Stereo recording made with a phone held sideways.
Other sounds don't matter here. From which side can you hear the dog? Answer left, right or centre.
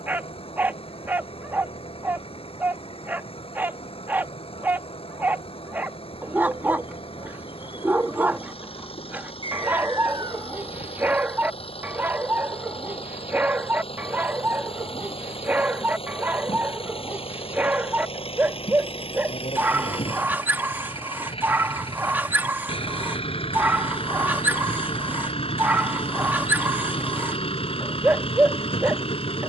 centre.